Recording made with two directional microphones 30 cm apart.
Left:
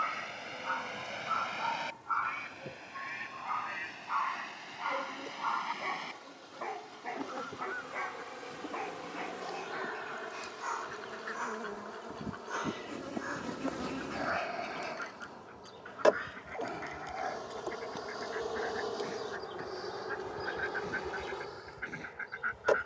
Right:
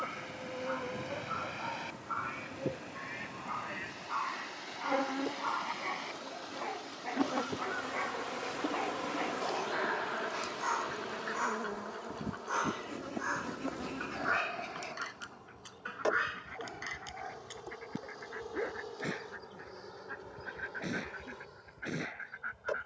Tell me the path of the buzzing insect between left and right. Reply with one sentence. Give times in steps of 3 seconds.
You can hear the buzzing insect on the right from 0 s, in the centre from 12 s and on the left from 15 s.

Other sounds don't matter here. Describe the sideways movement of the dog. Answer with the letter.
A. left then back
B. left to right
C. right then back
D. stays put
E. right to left
B.